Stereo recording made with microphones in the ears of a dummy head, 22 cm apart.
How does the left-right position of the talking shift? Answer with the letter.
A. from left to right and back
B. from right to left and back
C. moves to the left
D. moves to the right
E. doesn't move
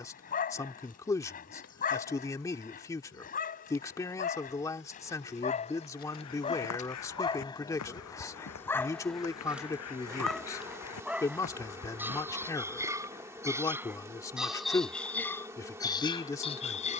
E.